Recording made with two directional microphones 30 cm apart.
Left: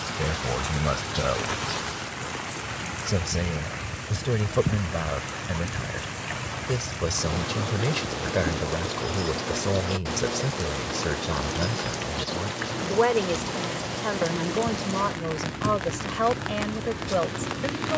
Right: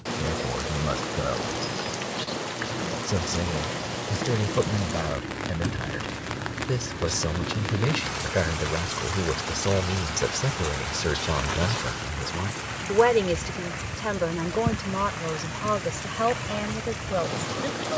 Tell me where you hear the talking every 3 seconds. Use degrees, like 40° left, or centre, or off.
20° left, 10° left, centre, 10° right, 10° right, 10° left.